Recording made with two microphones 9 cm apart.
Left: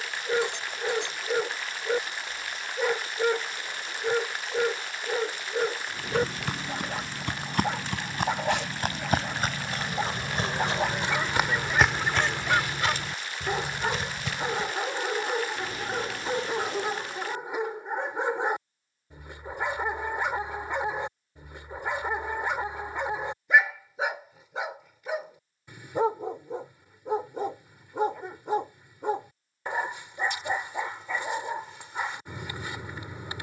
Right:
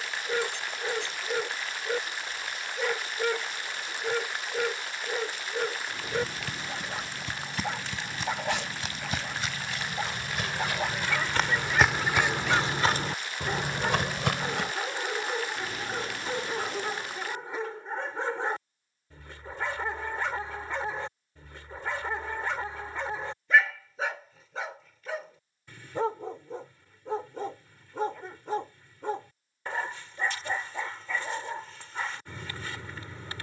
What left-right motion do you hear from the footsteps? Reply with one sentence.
You can hear the footsteps move from left to right.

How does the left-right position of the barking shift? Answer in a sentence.
In this clip you hear the barking stay in one place.